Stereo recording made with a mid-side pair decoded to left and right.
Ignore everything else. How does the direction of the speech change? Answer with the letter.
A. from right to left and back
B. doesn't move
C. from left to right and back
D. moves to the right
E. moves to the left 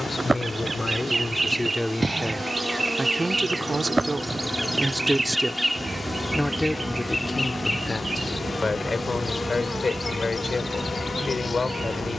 C.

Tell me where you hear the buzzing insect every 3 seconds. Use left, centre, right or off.
right, centre, left, left.